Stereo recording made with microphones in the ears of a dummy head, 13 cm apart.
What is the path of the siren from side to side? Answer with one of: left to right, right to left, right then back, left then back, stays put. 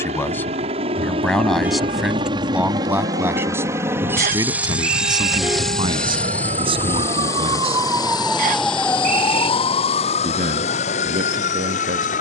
right to left.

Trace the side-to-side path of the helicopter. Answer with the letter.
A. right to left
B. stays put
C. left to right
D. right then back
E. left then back
A.